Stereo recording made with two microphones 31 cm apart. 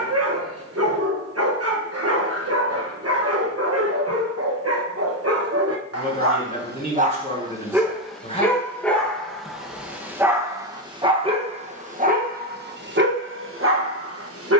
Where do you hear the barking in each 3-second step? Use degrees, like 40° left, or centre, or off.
50° right, 50° right, 20° right, 10° right, 40° right.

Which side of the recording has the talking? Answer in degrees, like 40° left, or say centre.
20° left.